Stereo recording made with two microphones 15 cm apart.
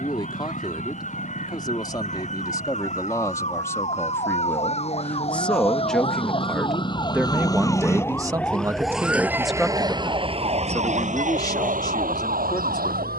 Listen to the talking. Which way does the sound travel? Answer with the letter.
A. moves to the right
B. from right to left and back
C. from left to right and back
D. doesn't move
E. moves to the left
C.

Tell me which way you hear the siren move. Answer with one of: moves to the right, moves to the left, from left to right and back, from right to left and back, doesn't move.
moves to the right.